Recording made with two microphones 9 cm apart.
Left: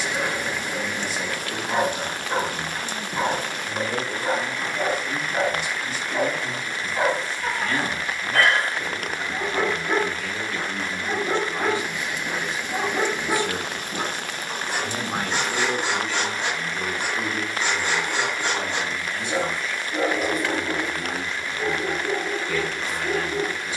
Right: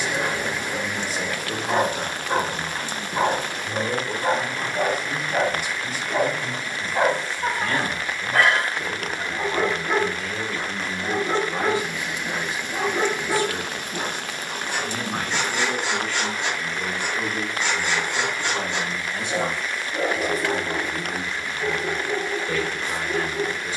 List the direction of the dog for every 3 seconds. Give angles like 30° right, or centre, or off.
40° right, 40° right, 30° right, 10° left, 30° left, 40° left, 40° left, 40° left.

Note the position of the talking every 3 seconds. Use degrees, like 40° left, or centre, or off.
40° right, 40° right, 40° right, 40° right, 10° left, 10° left, 20° right, 40° right.